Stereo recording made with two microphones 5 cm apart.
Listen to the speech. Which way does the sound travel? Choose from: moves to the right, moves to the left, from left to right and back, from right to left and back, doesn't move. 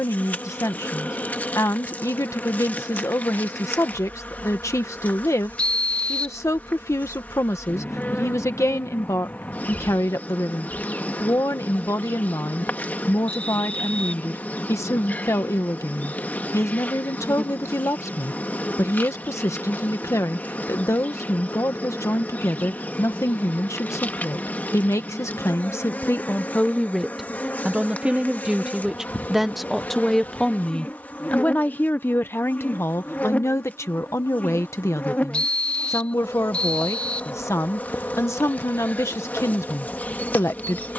from left to right and back.